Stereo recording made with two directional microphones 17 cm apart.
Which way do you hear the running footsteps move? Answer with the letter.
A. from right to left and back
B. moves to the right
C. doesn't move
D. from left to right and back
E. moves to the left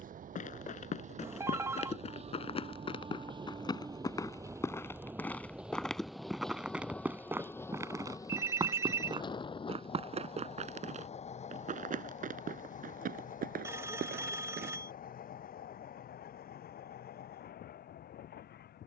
B.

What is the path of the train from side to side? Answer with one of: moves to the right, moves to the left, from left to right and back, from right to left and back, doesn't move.
moves to the left.